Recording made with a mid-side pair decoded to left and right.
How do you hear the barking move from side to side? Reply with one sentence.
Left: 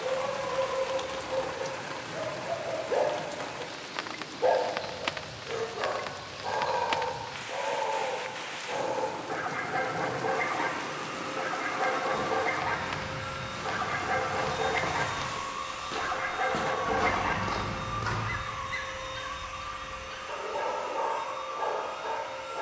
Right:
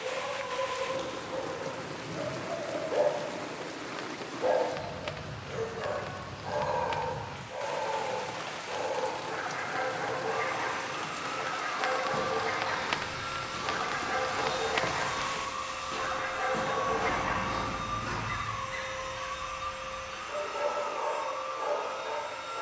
You can hear the barking stay put.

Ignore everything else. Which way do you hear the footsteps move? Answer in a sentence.
You can hear the footsteps move from right to left.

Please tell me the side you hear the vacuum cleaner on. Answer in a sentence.
In this clip you hear the vacuum cleaner on the right.